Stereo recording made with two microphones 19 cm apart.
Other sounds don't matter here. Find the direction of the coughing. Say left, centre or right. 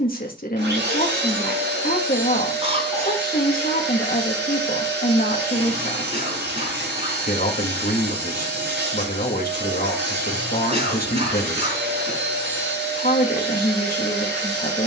right.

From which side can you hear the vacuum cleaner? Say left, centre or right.
right.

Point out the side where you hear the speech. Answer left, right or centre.
left.